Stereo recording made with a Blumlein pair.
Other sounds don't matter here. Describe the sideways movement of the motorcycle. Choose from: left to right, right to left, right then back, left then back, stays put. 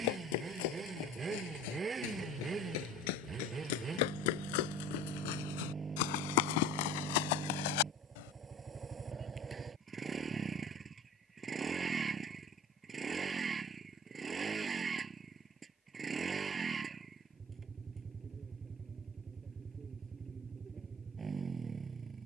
stays put.